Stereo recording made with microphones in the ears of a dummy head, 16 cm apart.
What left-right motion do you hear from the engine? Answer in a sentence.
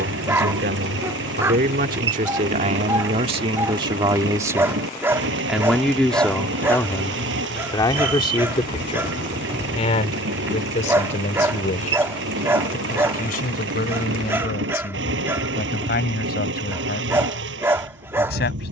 You can hear the engine stay put.